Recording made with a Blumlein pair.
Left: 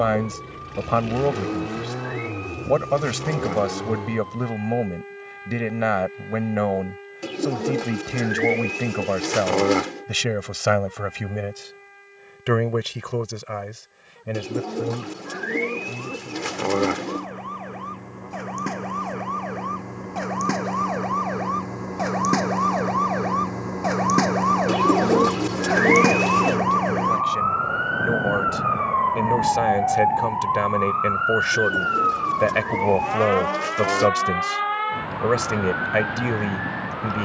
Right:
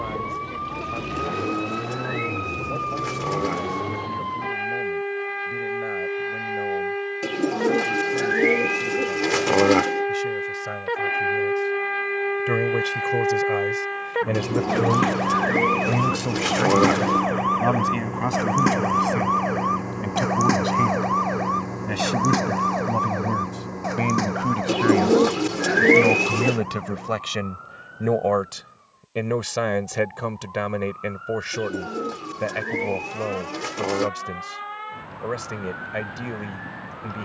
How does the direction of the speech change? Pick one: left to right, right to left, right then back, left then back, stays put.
right then back.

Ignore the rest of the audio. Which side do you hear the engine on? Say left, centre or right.
centre.